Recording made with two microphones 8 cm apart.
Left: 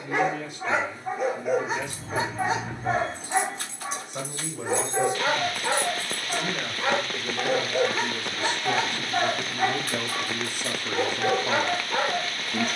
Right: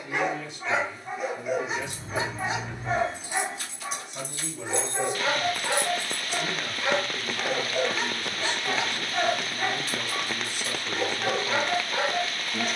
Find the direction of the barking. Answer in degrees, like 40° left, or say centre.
40° left.